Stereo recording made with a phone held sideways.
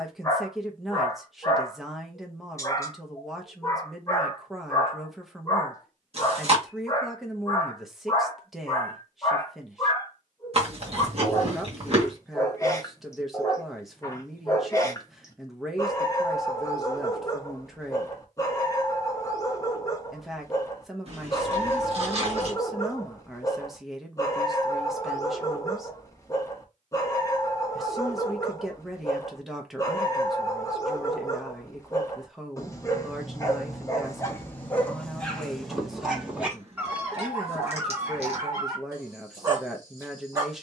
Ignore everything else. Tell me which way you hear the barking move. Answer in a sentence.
You can hear the barking go from the left side to the right.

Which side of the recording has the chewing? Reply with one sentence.
You can hear the chewing on the right.